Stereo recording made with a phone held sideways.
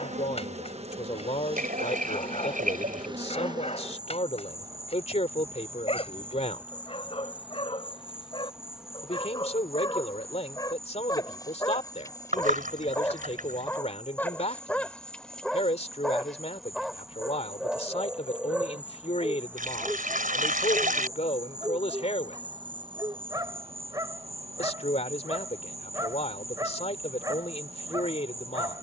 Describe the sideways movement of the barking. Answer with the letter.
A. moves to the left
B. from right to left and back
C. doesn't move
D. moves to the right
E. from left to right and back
D.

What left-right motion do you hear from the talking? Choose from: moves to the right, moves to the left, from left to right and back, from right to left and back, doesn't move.
doesn't move.